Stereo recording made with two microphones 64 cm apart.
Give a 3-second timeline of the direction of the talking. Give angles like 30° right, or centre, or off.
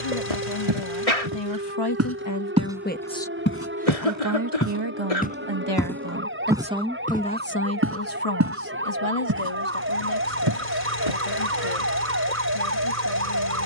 40° left, 30° right, 10° left, 50° left, 50° left.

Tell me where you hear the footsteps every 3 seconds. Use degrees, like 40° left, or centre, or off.
30° right, 20° left, 10° right, 40° right, off.